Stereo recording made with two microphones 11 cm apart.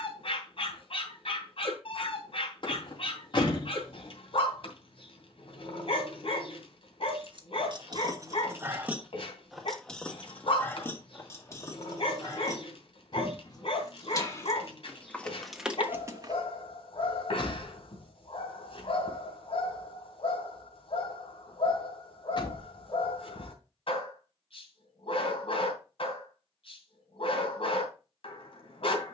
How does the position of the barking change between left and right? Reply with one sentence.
In this clip you hear the barking stay put.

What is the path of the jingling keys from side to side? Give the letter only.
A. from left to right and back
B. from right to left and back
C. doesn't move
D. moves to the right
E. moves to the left
B.